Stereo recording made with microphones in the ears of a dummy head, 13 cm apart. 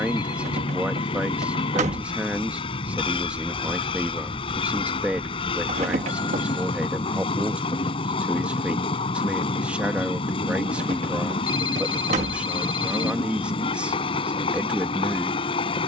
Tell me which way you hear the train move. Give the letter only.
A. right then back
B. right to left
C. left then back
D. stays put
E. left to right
D.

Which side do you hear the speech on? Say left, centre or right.
centre.